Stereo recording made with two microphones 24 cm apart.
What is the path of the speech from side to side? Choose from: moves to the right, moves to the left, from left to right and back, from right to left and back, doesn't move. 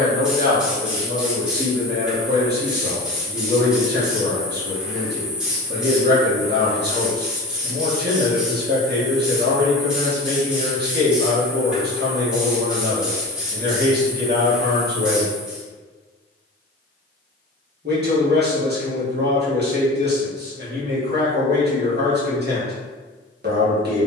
doesn't move.